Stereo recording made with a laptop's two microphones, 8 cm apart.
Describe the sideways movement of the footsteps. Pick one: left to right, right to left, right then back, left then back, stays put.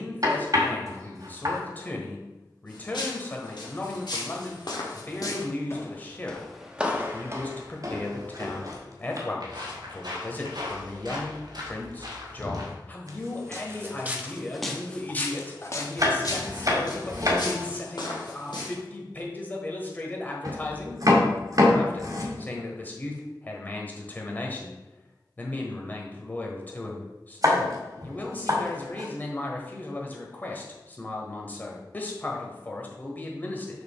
right then back.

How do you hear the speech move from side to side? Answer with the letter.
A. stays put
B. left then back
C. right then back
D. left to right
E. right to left
A.